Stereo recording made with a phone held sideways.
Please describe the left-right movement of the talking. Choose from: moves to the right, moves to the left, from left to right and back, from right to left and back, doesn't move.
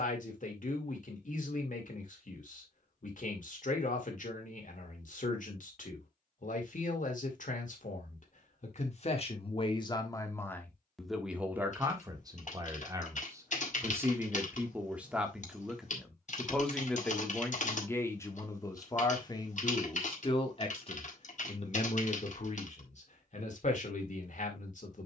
from left to right and back.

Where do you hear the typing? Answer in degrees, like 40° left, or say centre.
50° left.